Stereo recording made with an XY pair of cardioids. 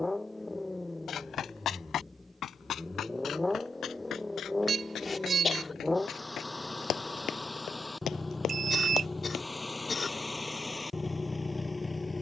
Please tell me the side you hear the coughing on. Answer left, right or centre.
left.